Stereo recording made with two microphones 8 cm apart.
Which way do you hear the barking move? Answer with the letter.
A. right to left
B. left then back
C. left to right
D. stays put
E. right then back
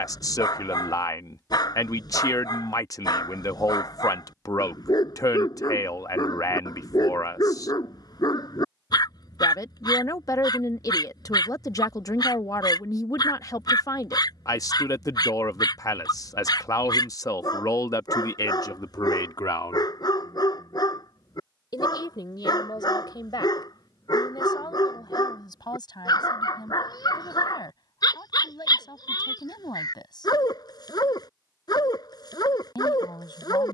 D.